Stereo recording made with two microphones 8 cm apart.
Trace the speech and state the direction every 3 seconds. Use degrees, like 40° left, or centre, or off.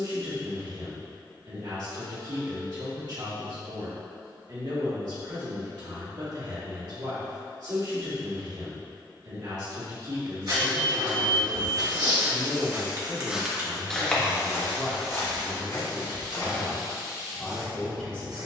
60° right, 60° right, 60° right, 50° right, 30° right, centre.